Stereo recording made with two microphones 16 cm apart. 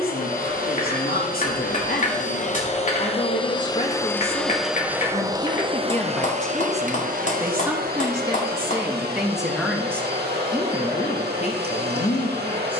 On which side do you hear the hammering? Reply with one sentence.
In this clip you hear the hammering on the left.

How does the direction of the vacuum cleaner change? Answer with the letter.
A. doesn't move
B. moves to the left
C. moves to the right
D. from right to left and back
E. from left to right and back
C.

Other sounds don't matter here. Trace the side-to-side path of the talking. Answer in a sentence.
In this clip you hear the talking move from left to right and back again.